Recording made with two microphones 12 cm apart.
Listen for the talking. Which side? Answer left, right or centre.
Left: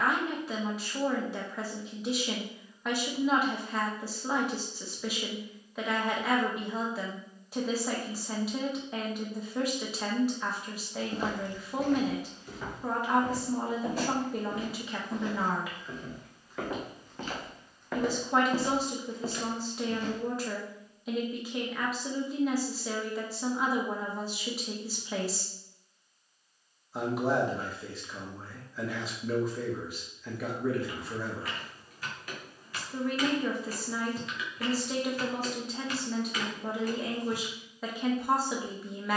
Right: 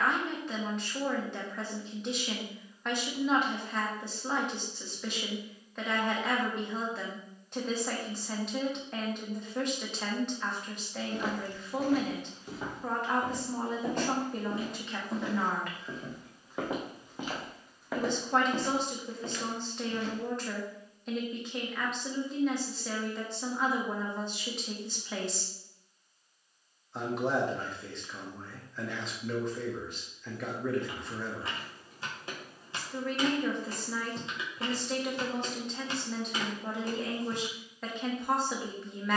centre.